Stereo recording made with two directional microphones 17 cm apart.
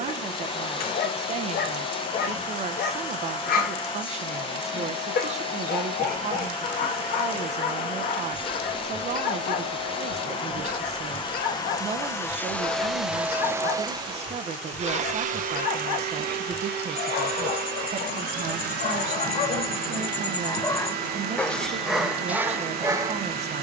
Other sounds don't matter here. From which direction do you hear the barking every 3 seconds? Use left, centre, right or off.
left, left, left, left, left, left, left, centre.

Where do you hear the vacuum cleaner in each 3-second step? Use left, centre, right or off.
left, left, left, left, centre, right, right, right.